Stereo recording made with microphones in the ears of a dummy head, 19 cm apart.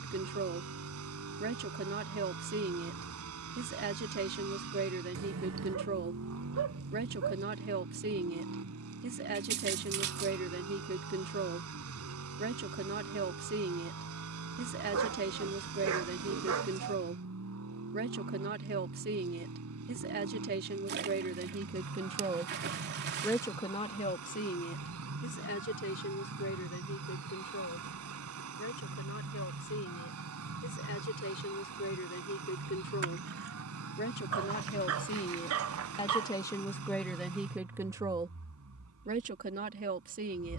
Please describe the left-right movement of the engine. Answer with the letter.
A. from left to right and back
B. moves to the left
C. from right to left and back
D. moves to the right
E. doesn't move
E.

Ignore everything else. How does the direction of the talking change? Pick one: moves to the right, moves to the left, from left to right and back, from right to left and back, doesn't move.
from right to left and back.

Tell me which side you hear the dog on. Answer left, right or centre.
right.